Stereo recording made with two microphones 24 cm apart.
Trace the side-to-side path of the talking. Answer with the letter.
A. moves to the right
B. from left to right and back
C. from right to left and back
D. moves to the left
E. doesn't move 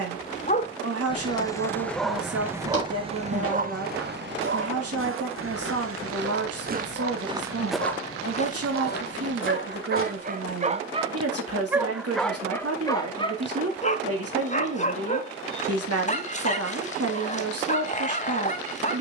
E.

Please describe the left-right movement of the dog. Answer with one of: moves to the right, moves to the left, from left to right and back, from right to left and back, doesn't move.
from left to right and back.